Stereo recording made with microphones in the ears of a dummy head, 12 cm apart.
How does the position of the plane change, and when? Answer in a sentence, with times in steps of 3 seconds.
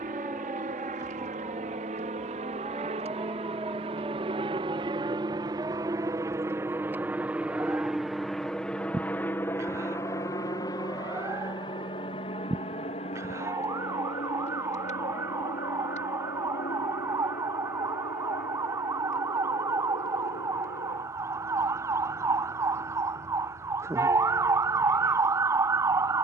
You can hear the plane on the right from 0 s, in the centre from 6 s and on the left from 9 s.